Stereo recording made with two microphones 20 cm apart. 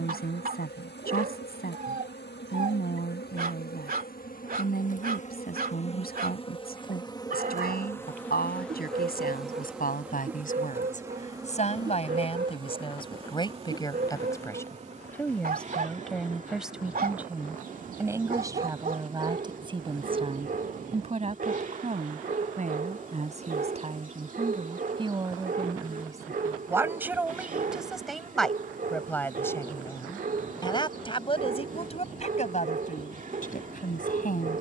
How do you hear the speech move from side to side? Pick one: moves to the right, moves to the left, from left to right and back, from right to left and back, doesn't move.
from left to right and back.